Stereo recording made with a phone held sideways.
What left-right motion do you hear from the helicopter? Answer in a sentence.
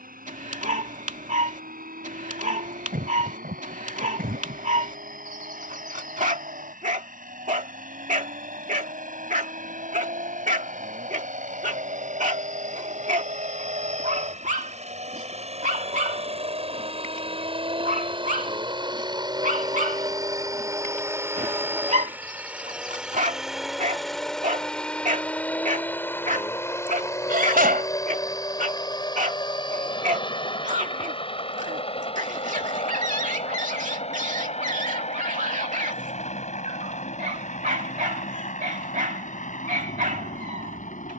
In this clip you hear the helicopter travel towards the left.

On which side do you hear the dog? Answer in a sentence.
You can hear the dog on the right.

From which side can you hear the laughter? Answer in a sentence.
In this clip you hear the laughter on the right.